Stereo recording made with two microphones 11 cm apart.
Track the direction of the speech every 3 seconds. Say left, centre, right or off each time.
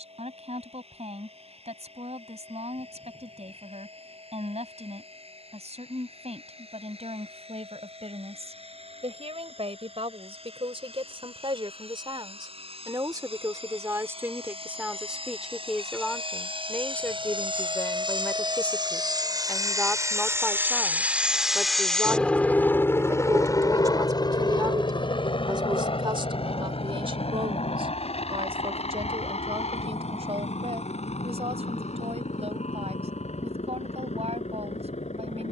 right, right, right, right, right, centre, centre, right, right, right, right, right.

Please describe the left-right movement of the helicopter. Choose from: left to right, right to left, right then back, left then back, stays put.
right to left.